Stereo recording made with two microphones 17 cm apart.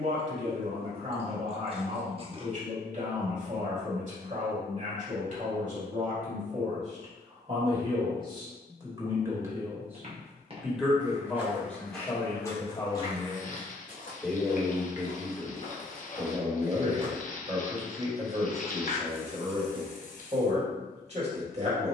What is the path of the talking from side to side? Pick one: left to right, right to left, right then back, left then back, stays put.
left then back.